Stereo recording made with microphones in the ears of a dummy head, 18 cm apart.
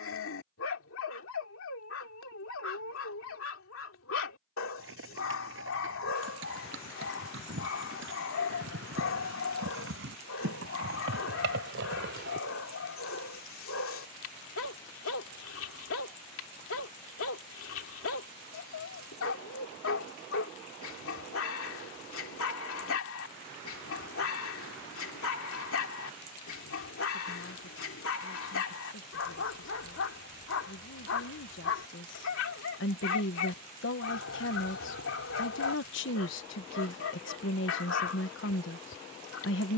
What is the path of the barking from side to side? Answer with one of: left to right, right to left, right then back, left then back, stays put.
stays put.